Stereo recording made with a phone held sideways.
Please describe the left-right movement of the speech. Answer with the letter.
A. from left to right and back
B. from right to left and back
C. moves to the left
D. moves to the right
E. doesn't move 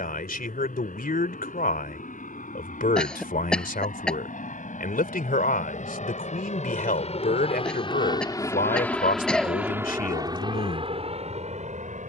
E.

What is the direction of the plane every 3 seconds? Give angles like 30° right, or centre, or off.
80° left, 70° left, 40° left, 30° right.